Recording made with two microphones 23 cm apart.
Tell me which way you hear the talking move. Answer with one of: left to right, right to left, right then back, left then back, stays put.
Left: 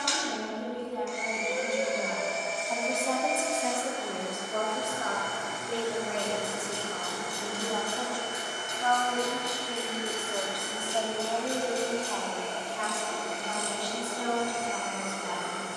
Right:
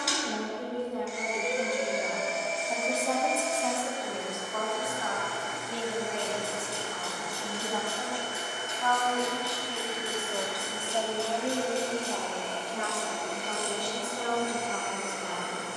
left then back.